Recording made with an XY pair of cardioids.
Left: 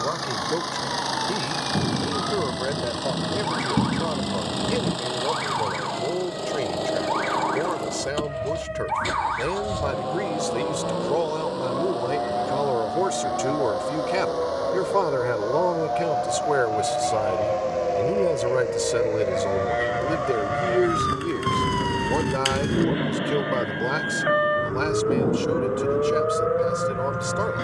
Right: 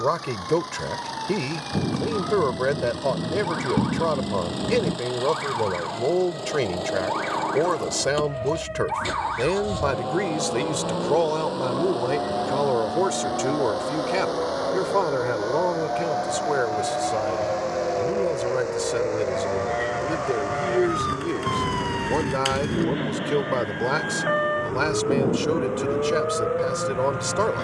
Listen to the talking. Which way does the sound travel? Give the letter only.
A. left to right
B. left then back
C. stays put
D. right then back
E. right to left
B.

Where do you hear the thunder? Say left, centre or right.
centre.